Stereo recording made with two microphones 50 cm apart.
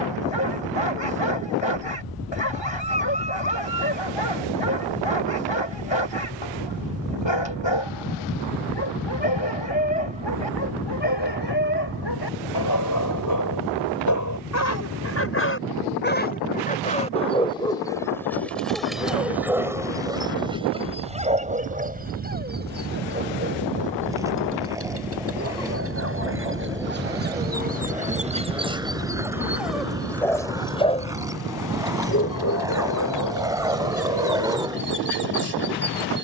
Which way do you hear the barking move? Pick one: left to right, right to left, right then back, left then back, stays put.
right then back.